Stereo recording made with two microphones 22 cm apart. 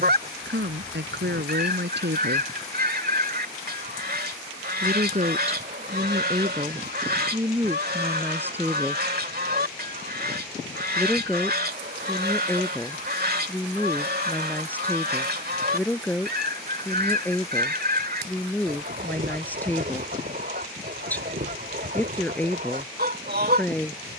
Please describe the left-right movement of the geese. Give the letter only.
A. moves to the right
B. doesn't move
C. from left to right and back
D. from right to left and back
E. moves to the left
B.